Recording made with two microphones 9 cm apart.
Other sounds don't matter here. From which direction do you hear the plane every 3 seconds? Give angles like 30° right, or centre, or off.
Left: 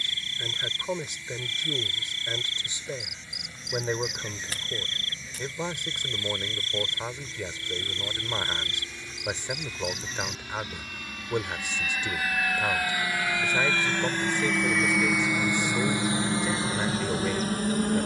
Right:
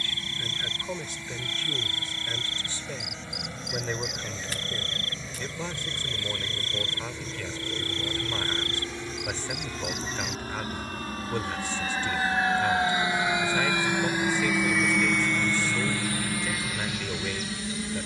60° right, 50° right, 50° right, 40° right, 20° right, 30° left.